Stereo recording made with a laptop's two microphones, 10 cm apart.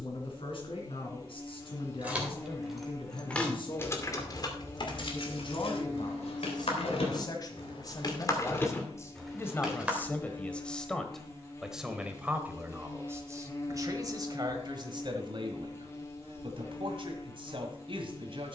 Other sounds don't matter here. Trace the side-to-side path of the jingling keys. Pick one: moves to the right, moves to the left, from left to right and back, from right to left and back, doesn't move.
from right to left and back.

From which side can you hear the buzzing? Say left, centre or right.
left.